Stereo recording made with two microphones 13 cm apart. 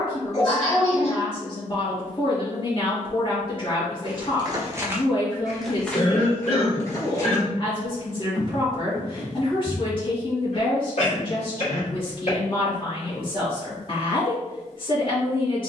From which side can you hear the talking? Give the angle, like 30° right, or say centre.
40° left.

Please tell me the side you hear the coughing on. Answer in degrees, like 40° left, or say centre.
50° left.